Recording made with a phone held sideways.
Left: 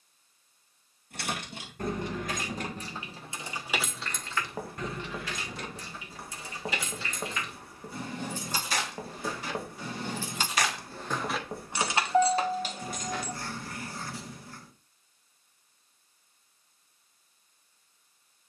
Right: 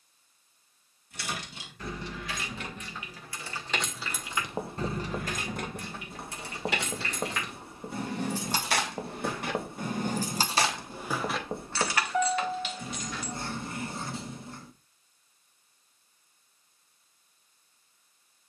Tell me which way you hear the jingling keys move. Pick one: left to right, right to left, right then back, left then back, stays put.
right then back.